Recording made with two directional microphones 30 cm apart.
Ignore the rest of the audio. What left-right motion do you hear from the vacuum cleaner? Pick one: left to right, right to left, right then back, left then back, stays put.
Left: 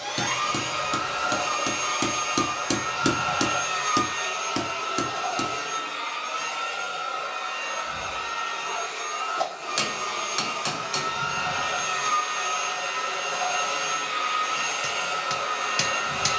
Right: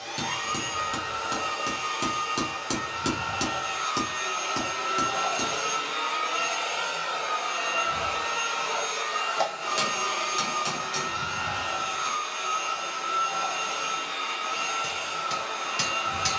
right then back.